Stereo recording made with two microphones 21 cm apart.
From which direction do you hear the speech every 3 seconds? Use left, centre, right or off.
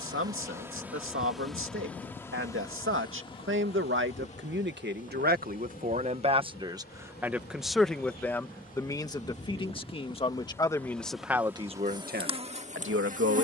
right, right, centre, centre, right.